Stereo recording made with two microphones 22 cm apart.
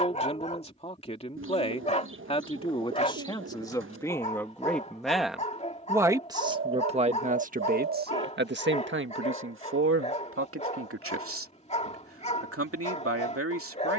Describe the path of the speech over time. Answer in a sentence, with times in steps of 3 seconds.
In this clip you hear the speech on the left from 0 s, in the centre from 3 s and on the right from 6 s.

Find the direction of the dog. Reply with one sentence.
You can hear the dog on the left.